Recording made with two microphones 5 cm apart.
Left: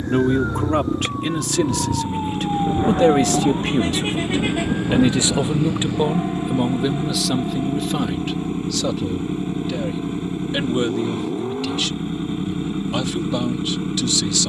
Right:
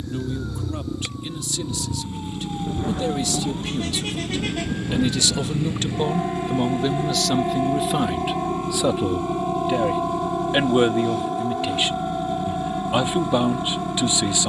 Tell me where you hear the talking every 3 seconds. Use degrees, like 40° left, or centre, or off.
70° left, 40° left, centre, 20° right, 20° right.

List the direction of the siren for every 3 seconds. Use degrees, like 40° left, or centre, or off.
40° left, 10° left, 40° right, 70° right, 80° right.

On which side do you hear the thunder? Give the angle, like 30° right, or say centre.
30° left.